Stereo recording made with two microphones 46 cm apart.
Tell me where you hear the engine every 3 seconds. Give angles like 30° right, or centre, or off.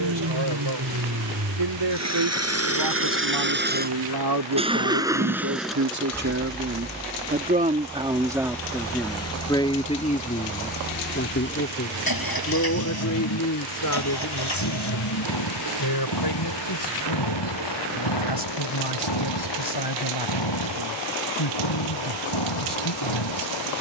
40° right, 10° right, 20° left, 40° left, 50° left, 60° left, 70° left, 70° left.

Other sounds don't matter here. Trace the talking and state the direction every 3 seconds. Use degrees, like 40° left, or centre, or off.
70° right, 50° right, 20° right, 20° left, 40° left, 50° left, 60° left, 60° left.